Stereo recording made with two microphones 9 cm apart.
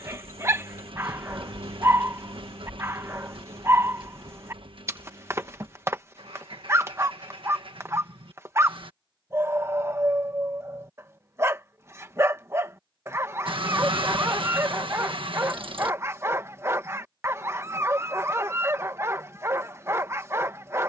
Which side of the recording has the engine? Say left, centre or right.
right.